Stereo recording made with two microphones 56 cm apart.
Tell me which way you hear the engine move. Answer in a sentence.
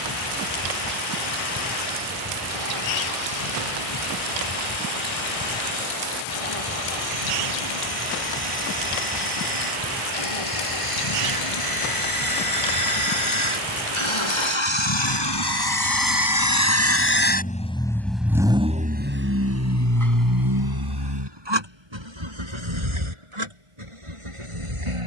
In this clip you hear the engine go from the left side to the right.